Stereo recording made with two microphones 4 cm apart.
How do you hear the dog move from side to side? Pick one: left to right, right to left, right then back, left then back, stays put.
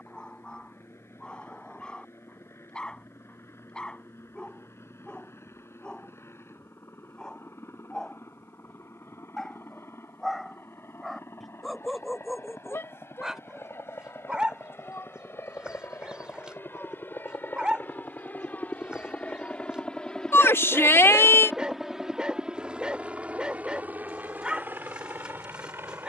left to right.